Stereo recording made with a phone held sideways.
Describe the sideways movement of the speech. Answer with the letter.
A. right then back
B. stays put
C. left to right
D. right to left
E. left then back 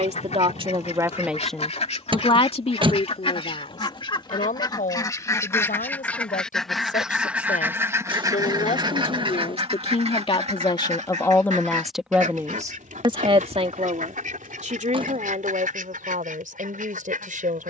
E.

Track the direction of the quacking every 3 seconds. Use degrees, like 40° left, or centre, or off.
50° left, 30° left, 10° right, 50° right, 70° right, 80° right.